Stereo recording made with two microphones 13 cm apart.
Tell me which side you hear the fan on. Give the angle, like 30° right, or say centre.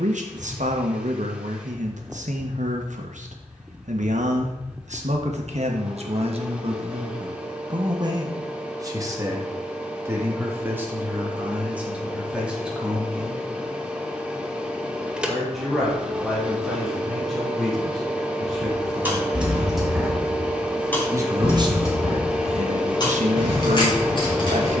10° right.